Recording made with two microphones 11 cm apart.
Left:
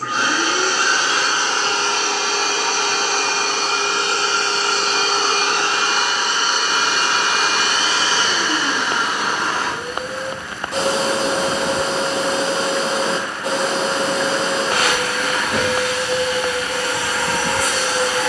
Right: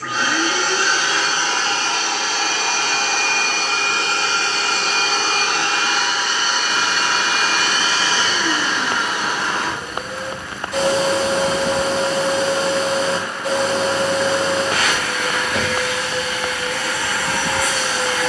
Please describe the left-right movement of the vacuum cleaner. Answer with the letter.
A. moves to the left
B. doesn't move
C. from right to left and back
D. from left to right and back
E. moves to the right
B.